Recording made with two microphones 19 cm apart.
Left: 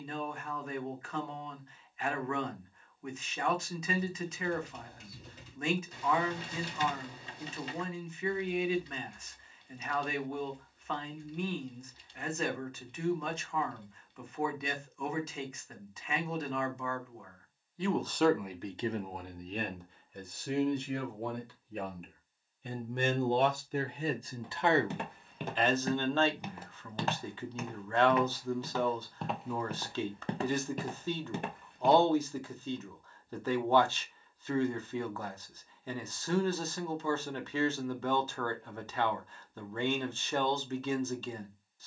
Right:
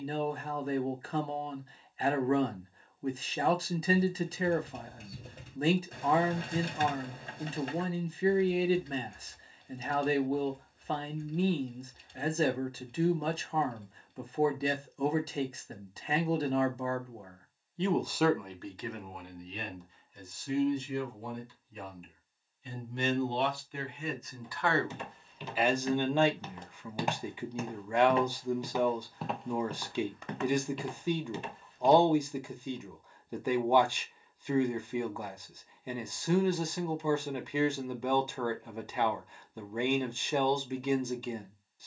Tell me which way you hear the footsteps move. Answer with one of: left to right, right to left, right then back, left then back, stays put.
right then back.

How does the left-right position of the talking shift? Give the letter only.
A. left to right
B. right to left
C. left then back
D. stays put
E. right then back
C.